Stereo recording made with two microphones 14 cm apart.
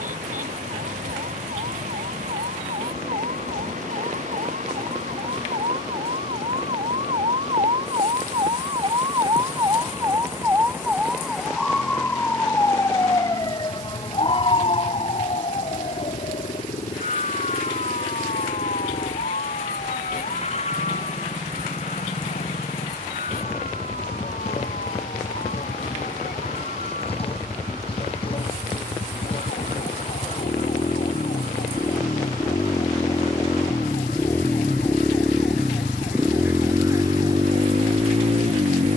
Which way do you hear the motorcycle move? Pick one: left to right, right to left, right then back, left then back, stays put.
left to right.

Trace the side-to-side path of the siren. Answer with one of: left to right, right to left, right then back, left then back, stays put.
right to left.